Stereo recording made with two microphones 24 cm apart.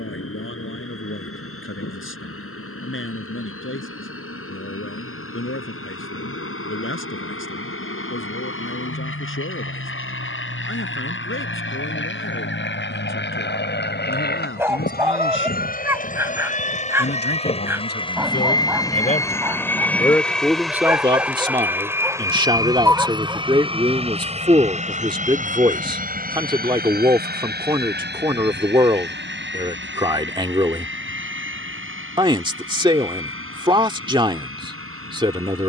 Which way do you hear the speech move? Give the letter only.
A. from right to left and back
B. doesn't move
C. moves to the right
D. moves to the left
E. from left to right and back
C.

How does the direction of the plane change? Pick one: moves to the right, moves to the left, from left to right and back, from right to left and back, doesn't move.
moves to the right.